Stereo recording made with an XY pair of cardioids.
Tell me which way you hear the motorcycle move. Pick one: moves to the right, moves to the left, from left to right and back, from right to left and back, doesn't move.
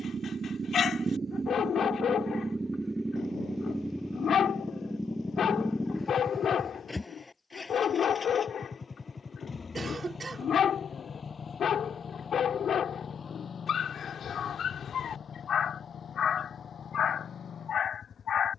moves to the left.